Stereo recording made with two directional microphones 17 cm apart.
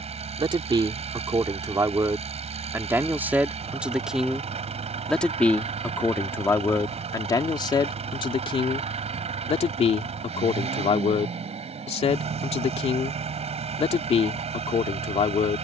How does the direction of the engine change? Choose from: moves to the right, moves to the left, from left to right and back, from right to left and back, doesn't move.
doesn't move.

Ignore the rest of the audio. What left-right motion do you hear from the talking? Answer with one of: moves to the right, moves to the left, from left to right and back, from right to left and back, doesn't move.
moves to the left.